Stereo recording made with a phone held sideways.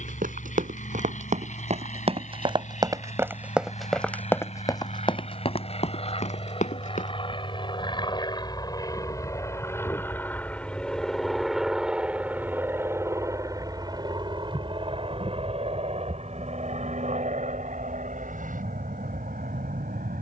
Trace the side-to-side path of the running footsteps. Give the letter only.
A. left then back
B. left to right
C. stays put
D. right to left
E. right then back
D.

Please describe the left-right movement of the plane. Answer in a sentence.
You can hear the plane move from left to right.